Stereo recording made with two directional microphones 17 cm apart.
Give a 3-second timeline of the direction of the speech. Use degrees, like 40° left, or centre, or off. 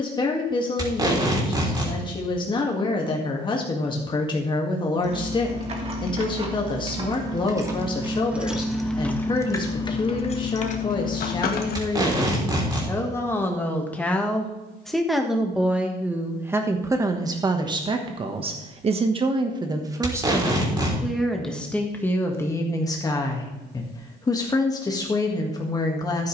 30° left, 30° left, 30° left, 30° left, 10° left, 10° right, 20° right, 10° left, 20° left.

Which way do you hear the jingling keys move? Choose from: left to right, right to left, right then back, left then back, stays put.
right to left.